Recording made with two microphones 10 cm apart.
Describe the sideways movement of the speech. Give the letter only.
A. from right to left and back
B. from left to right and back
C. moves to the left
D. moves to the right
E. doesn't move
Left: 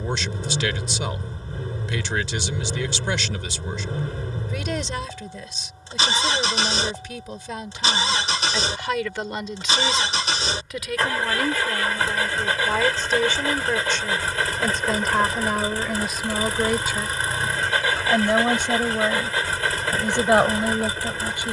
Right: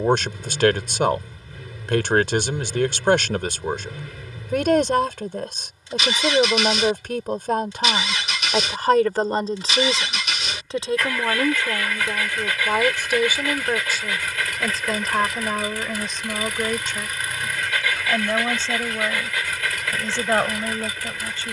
C.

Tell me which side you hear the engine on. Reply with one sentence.
In this clip you hear the engine on the left.